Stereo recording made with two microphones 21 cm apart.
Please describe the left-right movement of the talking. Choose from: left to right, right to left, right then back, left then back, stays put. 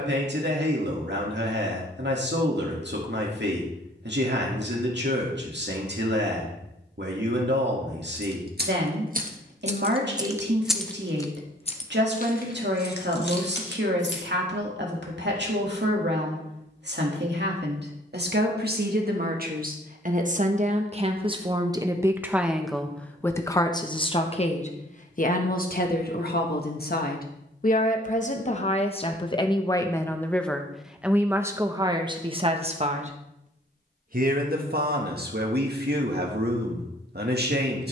left then back.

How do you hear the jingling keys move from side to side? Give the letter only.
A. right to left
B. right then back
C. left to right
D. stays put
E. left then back
A.